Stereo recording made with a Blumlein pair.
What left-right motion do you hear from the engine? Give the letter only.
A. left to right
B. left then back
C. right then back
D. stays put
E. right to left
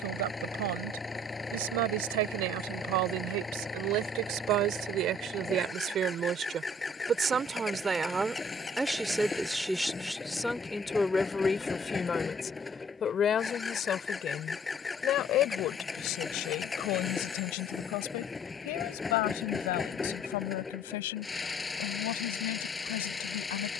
D.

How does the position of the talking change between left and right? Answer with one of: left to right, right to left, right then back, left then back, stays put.
right to left.